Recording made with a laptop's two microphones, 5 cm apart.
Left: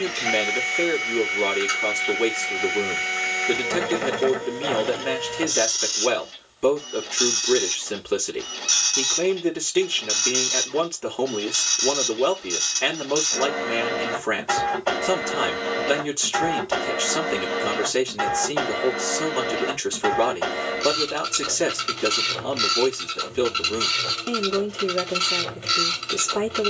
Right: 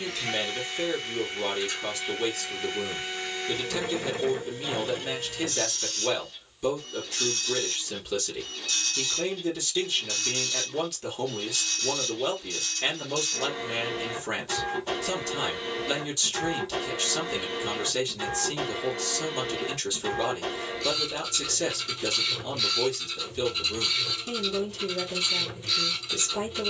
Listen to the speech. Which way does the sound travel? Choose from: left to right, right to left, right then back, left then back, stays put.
stays put.